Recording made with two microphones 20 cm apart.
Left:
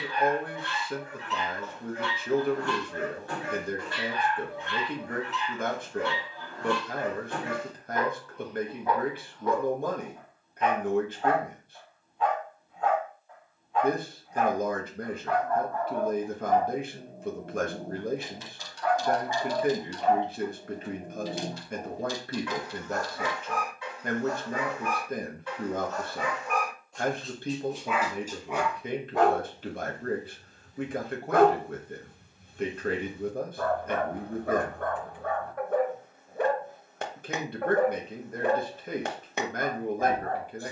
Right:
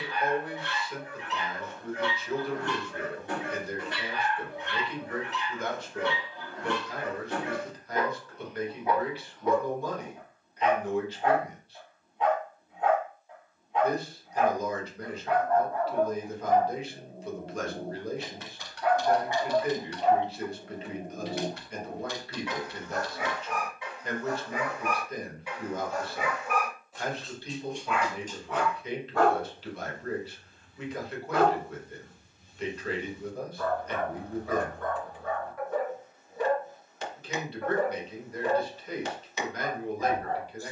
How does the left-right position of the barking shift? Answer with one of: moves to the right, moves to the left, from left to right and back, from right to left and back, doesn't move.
moves to the left.